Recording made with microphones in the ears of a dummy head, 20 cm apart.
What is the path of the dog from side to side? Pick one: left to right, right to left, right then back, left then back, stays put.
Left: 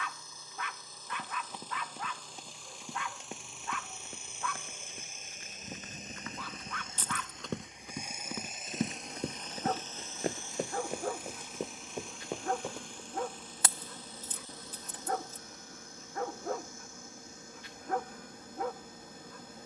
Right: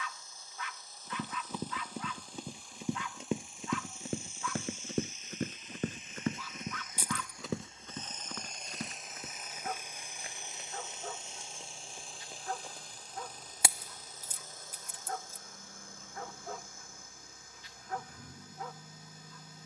stays put.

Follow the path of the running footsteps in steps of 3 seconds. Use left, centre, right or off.
right, right, centre, left, left, off, off.